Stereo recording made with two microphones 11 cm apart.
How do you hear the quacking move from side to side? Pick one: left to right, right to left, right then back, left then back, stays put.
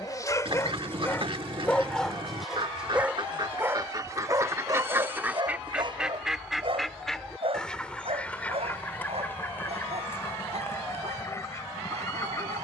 right to left.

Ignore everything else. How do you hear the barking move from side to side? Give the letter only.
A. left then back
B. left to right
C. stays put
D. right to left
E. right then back
B.